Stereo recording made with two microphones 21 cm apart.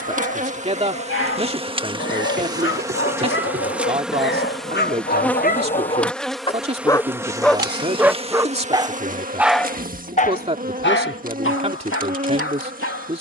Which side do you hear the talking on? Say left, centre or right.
right.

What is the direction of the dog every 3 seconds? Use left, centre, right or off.
left, left, centre, left, left.